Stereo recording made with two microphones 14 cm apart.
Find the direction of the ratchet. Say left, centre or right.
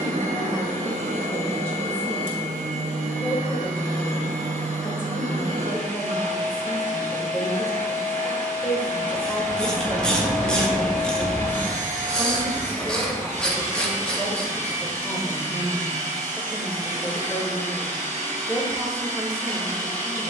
centre.